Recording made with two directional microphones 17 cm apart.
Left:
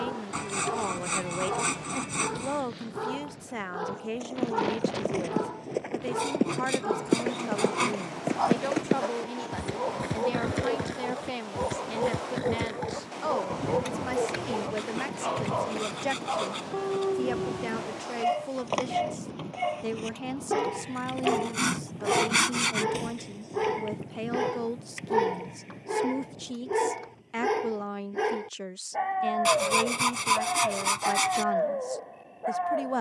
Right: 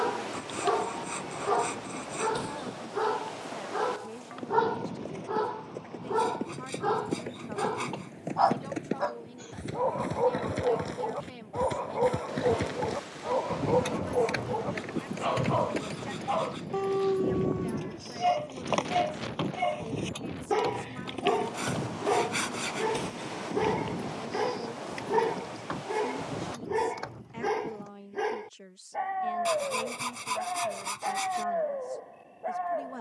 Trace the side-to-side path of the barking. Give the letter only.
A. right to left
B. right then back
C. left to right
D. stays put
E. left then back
A.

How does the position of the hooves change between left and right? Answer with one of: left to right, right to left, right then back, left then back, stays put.
left to right.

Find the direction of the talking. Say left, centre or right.
left.